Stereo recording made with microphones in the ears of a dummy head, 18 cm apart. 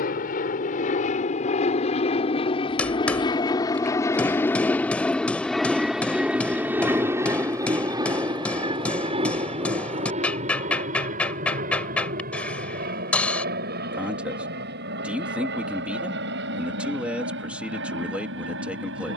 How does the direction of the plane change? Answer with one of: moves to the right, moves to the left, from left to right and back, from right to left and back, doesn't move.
moves to the right.